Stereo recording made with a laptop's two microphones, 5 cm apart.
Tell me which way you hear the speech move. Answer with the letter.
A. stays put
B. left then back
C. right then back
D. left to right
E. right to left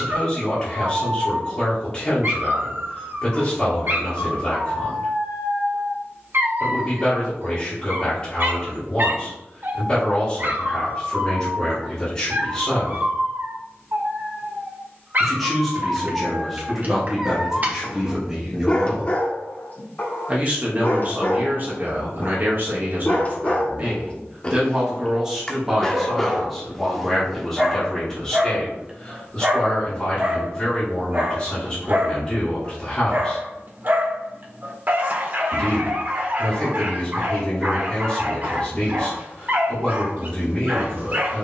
C.